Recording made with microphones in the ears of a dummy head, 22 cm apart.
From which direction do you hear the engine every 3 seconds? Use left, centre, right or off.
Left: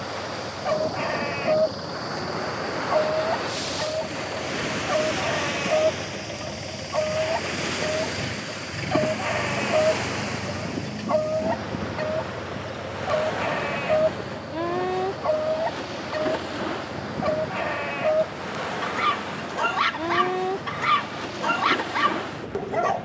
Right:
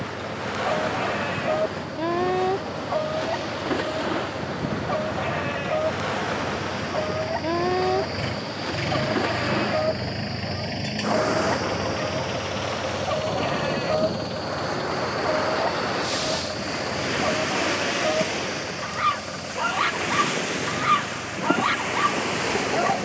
left, left, centre, right, right, right, right, right.